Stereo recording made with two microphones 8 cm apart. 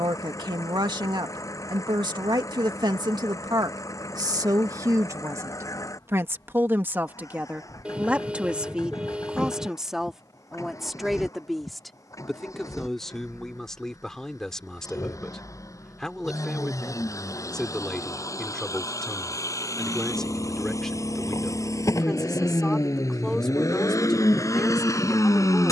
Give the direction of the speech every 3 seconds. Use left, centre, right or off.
right, right, right, centre, centre, centre, centre, centre, centre.